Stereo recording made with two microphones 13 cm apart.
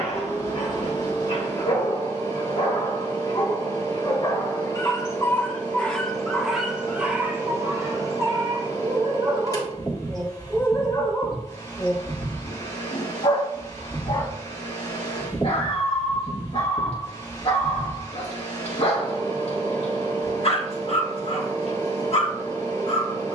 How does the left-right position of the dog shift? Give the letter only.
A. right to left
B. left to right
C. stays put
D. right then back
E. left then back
D.